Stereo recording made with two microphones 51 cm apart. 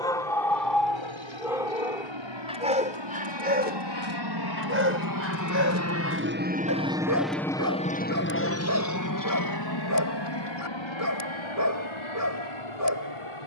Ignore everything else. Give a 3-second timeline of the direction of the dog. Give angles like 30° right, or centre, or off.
centre, 20° right, 30° right, 30° right, 30° right.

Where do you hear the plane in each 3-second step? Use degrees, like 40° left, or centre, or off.
70° right, 50° right, centre, 50° left, 60° left.